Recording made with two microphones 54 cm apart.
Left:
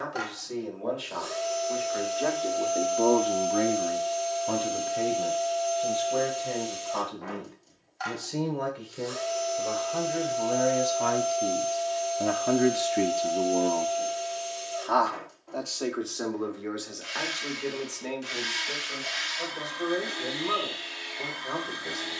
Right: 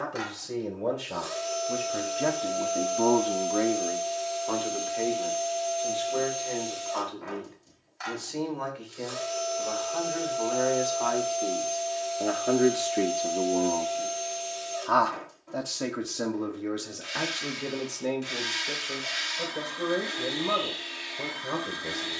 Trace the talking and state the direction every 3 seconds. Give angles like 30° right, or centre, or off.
60° right, 30° left, 60° left, 50° left, 10° left, 50° right, 70° right, 70° right.